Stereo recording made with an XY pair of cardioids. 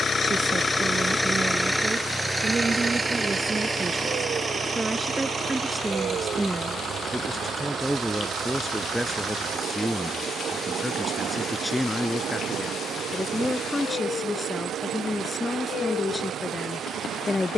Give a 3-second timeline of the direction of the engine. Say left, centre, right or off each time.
centre, right, right, right, right, right.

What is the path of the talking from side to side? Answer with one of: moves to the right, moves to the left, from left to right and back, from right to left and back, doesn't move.
moves to the left.